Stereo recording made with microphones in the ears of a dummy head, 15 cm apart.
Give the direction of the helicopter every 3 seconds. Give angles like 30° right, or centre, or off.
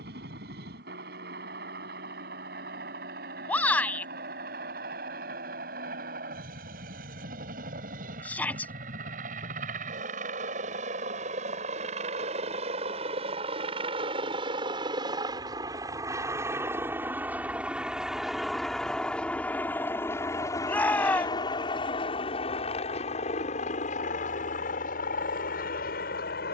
60° right, 60° right, 50° right, 40° right, 30° right, 10° right, 10° left, 30° left, 50° left.